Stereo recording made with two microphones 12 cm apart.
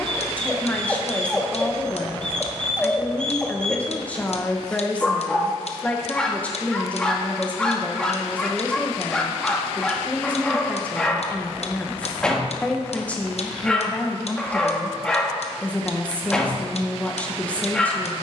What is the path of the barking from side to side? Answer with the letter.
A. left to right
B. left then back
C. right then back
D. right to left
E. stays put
E.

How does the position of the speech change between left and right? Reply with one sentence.
In this clip you hear the speech stay put.